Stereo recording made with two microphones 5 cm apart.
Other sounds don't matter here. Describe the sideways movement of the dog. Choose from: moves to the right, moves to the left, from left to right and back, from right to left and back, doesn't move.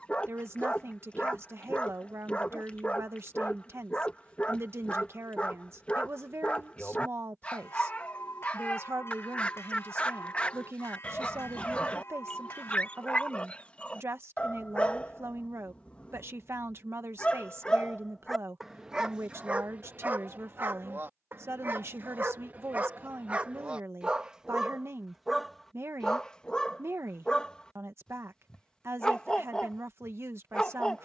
from left to right and back.